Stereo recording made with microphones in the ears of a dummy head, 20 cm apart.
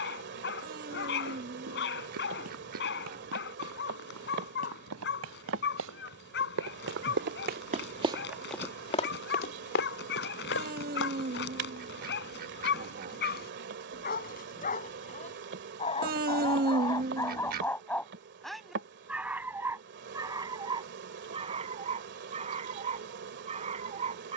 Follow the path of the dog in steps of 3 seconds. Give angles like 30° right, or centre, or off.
50° left, 50° left, 50° left, 50° left, 40° left, 20° left, 10° right, 30° right.